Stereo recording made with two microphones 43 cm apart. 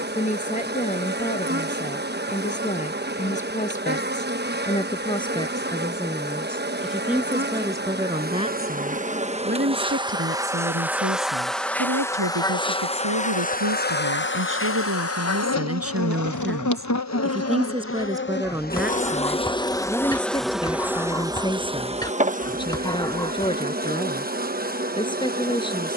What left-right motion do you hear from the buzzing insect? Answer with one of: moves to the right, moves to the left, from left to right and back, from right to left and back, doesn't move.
from right to left and back.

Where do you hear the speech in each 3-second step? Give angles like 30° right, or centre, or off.
20° left, 10° left, 10° right, 30° right, 50° right, 30° right, centre, 10° left, 10° left.